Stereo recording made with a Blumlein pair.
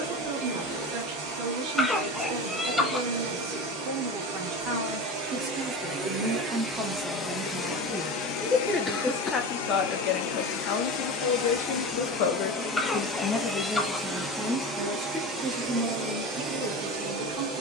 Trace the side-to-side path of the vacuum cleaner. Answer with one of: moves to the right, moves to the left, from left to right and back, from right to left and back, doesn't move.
from right to left and back.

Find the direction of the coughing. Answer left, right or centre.
centre.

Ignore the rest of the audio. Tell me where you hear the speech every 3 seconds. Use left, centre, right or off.
right, right, centre, left, centre, right.